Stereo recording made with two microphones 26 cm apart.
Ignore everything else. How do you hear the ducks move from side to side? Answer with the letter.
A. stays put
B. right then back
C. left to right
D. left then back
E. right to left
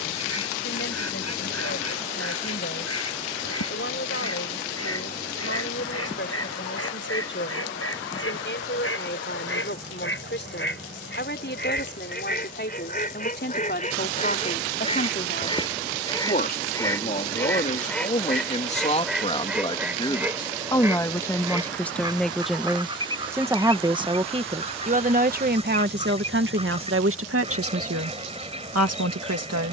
C.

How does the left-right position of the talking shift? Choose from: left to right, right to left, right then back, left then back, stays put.
left to right.